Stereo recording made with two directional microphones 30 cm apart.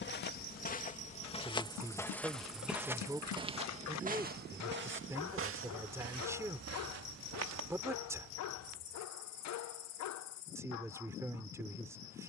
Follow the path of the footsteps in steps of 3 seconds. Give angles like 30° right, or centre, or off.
20° left, 30° right, 60° right, off.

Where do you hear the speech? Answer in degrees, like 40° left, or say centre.
10° right.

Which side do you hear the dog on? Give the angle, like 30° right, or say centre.
60° left.